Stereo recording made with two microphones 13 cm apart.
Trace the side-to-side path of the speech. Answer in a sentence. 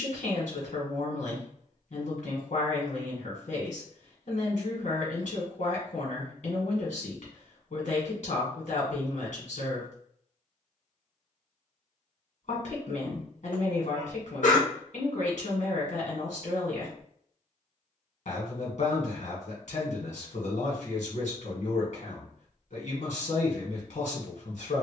In this clip you hear the speech stay put.